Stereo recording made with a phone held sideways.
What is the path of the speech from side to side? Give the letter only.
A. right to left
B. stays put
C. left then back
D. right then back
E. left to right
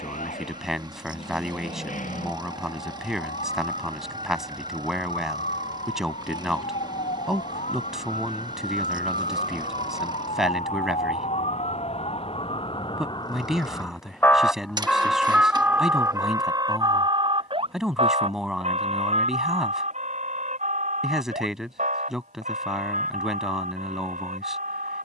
B.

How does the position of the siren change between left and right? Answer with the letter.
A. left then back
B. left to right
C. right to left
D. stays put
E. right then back
B.